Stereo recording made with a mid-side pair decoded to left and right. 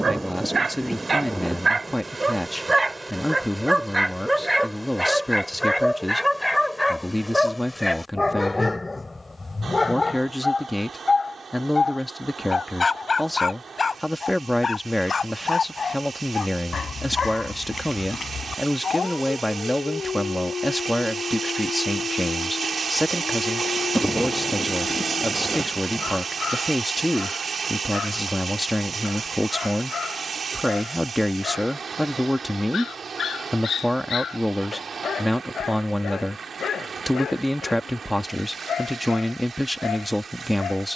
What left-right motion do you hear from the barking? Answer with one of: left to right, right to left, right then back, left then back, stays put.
right to left.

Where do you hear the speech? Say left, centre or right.
centre.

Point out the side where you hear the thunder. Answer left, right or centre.
centre.